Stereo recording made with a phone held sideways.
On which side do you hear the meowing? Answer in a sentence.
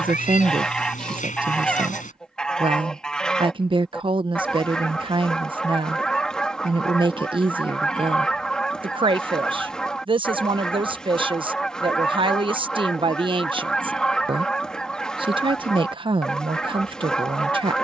You can hear the meowing on the left.